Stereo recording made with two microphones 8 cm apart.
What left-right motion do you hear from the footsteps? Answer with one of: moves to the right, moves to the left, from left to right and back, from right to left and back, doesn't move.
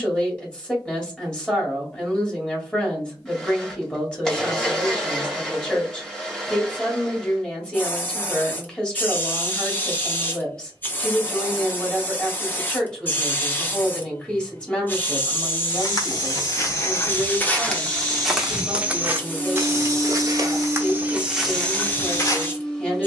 from left to right and back.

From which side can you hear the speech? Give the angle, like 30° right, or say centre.
10° left.